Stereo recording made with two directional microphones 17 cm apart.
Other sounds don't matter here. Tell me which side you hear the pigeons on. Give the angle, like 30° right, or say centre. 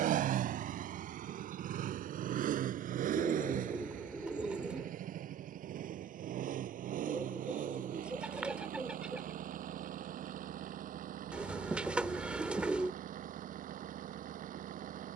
10° right.